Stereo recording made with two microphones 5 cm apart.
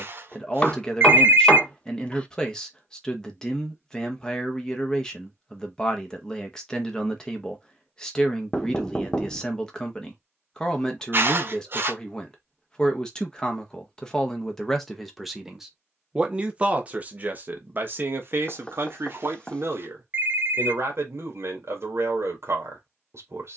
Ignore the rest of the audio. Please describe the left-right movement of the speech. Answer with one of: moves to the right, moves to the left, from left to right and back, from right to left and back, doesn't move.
moves to the right.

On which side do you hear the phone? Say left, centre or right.
right.